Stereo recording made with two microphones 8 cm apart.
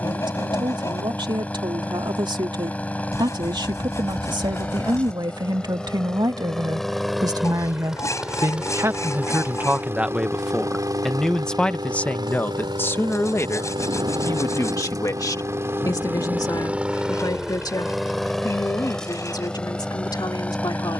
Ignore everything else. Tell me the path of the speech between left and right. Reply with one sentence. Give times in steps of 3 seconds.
You can hear the speech on the right from 0 s, in the centre from 9 s and on the left from 12 s.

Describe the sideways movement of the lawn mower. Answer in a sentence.
In this clip you hear the lawn mower go right and come back.